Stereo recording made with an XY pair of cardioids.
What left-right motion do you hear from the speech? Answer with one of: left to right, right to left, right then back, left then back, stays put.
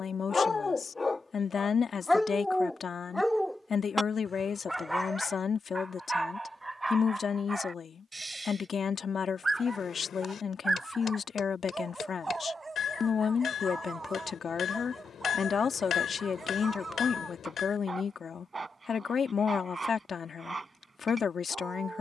stays put.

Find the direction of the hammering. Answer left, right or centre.
left.